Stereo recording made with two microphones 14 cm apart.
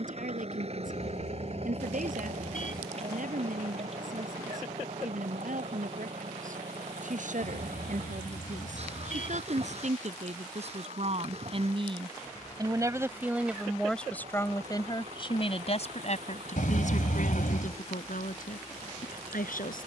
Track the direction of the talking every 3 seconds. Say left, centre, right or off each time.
right, right, right, right, centre, left, left.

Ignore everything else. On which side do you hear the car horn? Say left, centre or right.
left.